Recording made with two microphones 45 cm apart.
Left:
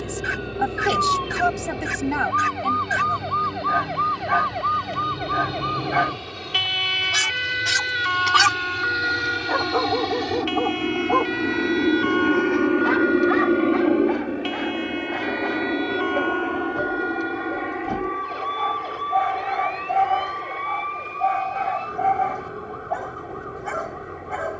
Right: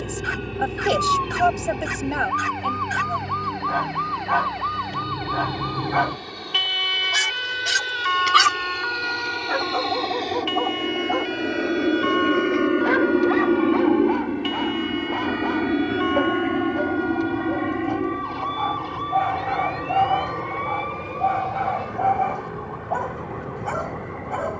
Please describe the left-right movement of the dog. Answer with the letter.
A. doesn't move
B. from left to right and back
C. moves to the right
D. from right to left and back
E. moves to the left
B.